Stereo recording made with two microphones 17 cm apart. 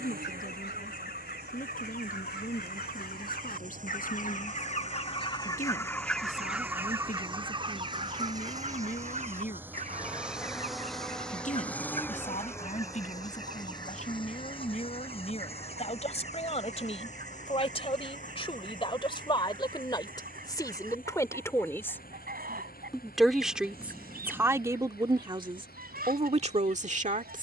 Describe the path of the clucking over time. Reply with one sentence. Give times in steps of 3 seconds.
In this clip you hear the clucking on the left from 0 s and on the right from 6 s.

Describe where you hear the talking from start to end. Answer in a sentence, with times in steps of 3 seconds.
In this clip you hear the talking on the left from 0 s, in the centre from 21 s and on the right from 24 s.